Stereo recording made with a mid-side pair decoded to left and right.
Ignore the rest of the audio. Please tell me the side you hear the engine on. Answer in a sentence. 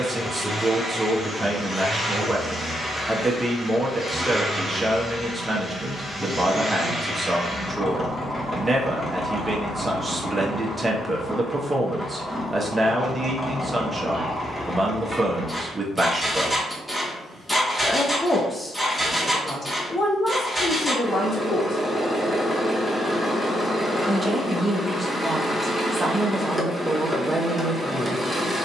In this clip you hear the engine in the centre.